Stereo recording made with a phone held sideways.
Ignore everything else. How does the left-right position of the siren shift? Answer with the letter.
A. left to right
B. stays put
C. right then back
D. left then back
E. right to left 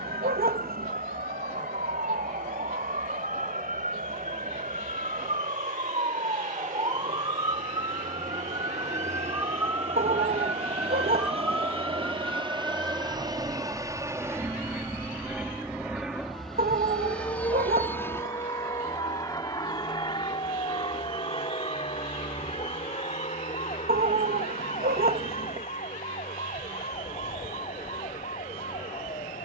E.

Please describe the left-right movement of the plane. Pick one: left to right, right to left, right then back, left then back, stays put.
right to left.